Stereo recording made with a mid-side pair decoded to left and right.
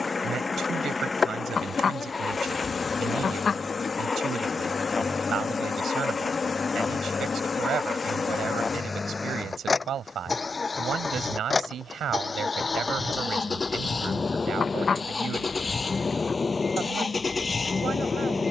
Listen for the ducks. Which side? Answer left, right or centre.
left.